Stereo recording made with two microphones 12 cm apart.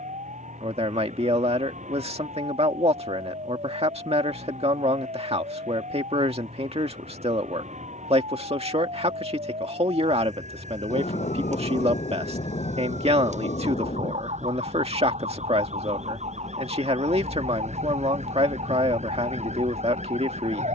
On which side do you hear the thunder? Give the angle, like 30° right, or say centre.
60° left.